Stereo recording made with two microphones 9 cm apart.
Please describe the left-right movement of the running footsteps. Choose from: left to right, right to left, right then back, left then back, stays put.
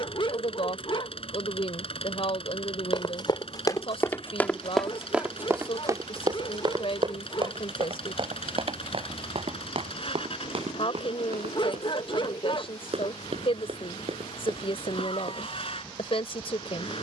left to right.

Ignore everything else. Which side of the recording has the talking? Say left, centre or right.
left.